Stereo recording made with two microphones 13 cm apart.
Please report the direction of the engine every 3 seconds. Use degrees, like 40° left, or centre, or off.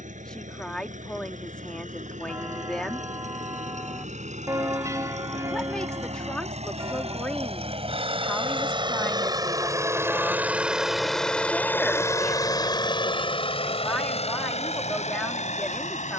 70° right, 60° right, 50° right, 10° right, 40° left, 60° left.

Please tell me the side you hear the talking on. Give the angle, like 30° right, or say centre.
10° left.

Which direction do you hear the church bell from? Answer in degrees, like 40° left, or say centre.
20° right.